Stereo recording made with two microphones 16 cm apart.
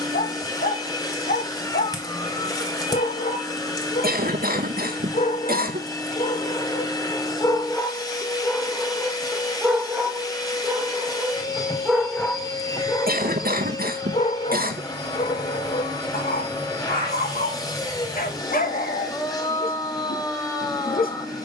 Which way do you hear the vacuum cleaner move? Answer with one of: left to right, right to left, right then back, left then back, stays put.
stays put.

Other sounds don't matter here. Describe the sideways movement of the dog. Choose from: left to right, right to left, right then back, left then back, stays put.
right then back.